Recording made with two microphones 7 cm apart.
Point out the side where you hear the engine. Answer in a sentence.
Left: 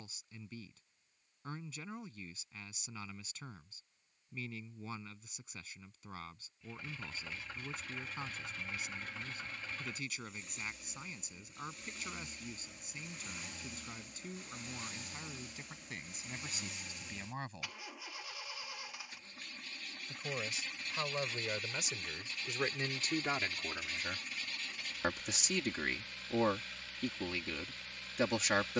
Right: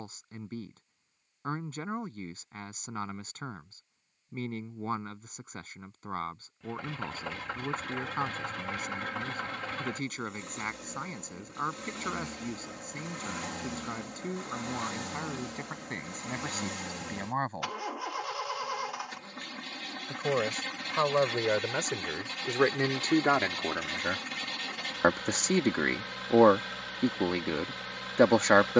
You can hear the engine on the right.